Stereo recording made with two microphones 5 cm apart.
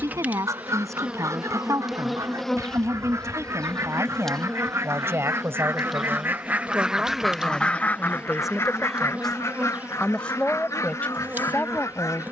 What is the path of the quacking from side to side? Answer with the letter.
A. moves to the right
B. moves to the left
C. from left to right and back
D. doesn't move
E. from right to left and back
B.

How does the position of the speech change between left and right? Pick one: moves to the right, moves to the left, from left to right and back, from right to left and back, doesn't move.
moves to the left.